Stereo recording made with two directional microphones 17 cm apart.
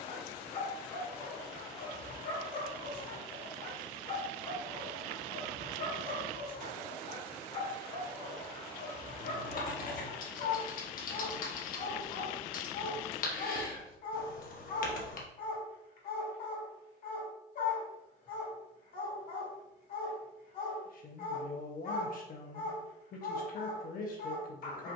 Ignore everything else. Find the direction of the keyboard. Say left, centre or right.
left.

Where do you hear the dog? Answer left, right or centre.
left.